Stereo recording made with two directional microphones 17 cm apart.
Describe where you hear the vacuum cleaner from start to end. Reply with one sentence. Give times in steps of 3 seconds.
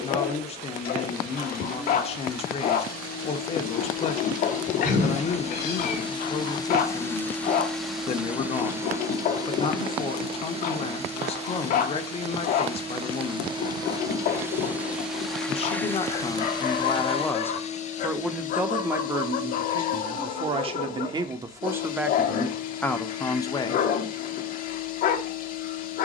You can hear the vacuum cleaner on the left from 0 s, in the centre from 6 s, on the right from 9 s and on the left from 15 s.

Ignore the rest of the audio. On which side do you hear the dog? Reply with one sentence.
You can hear the dog on the left.